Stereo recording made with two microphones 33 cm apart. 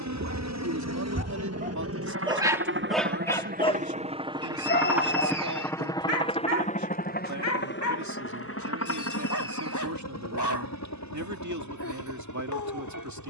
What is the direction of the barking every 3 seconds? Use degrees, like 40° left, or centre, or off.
30° right, 20° left, 60° left, 60° left, 60° left.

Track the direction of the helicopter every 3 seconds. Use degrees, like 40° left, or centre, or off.
50° right, 10° right, 30° left, 50° left, 60° left.